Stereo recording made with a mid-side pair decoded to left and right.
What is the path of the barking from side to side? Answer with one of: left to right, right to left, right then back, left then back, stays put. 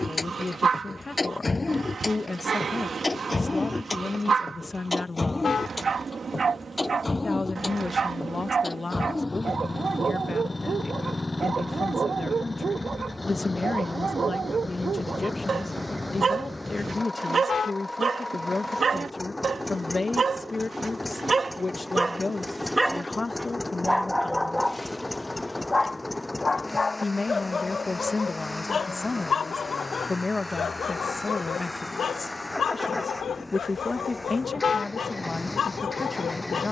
right to left.